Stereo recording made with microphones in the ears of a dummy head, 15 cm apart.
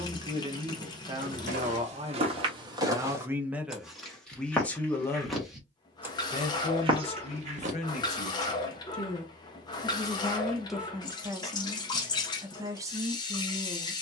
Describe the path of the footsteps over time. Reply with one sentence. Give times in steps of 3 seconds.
In this clip you hear the footsteps on the right from 0 s, in the centre from 3 s, on the right from 6 s and not at all from 9 s.